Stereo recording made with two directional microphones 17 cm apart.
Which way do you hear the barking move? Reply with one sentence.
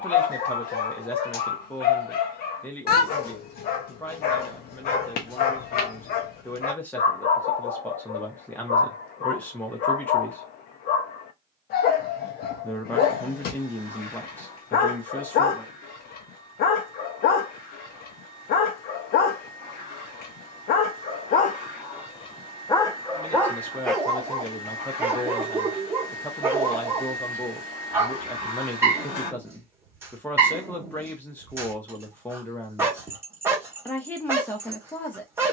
You can hear the barking move to the right.